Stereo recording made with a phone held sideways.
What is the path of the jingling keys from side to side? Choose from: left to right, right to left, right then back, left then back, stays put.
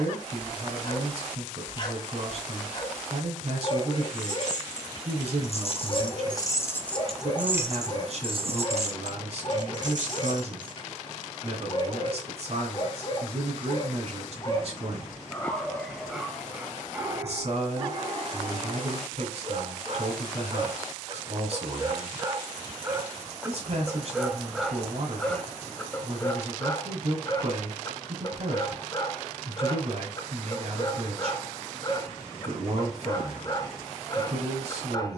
left to right.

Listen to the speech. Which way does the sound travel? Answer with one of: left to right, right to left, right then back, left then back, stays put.
stays put.